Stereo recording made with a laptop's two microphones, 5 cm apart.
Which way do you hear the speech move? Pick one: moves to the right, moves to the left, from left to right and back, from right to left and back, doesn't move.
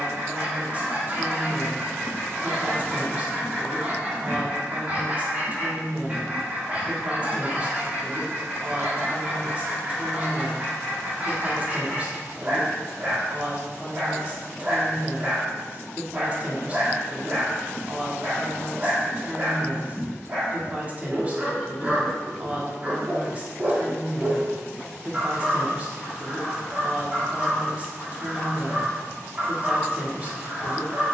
doesn't move.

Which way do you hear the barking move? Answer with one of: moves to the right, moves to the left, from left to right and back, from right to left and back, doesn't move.
doesn't move.